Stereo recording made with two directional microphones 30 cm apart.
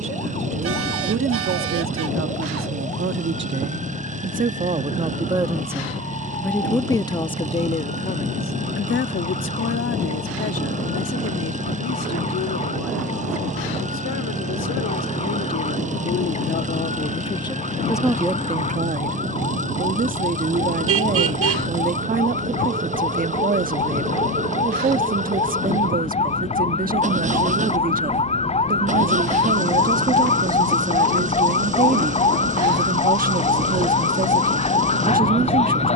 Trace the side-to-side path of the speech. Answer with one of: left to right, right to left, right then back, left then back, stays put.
left then back.